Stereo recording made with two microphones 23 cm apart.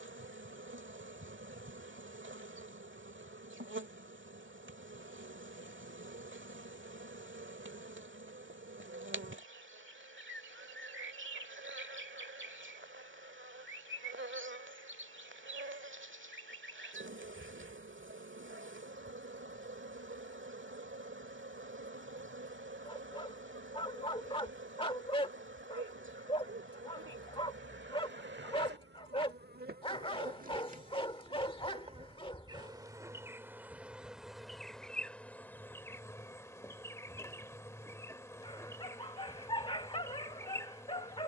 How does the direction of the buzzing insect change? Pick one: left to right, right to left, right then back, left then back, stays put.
right to left.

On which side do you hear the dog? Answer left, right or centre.
left.